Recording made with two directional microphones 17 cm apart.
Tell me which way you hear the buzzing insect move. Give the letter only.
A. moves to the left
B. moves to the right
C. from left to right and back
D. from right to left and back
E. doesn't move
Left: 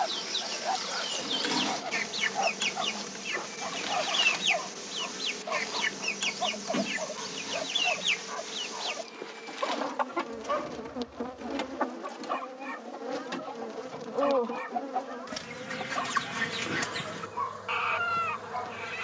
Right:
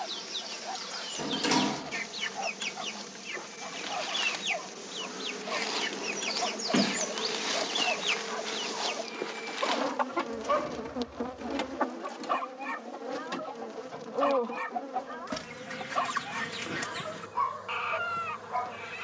C.